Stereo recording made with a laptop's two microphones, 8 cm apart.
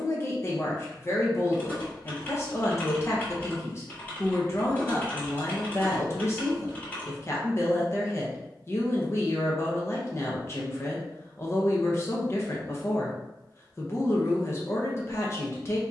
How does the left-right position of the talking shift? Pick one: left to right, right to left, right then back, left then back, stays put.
stays put.